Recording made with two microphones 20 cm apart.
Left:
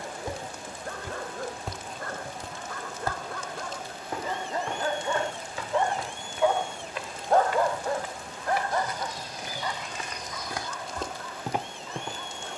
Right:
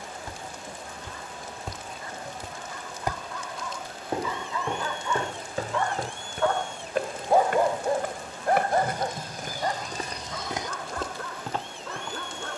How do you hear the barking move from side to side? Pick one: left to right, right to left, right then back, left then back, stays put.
left to right.